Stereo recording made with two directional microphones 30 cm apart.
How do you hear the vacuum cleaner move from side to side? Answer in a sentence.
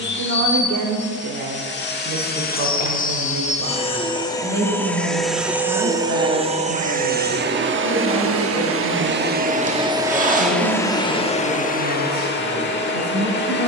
You can hear the vacuum cleaner go right and come back.